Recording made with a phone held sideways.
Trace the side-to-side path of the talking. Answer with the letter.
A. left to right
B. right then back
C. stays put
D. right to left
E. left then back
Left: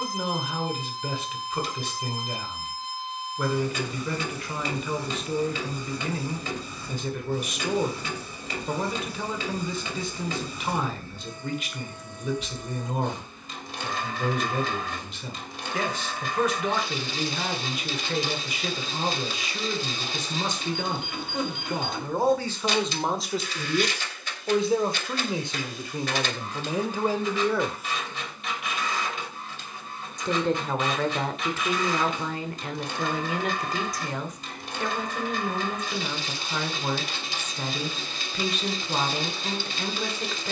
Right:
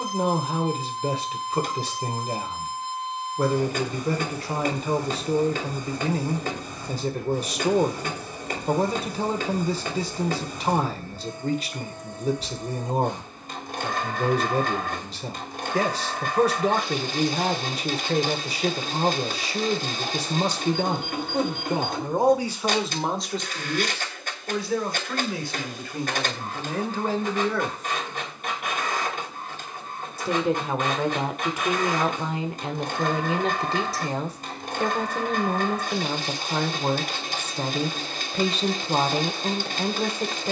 E.